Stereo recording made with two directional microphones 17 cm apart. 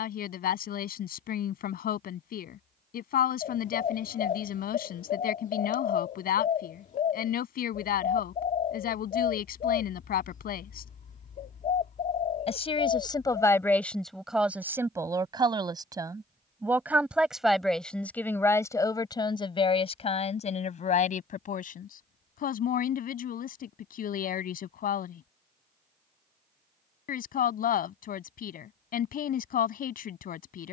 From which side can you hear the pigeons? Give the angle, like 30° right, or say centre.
50° left.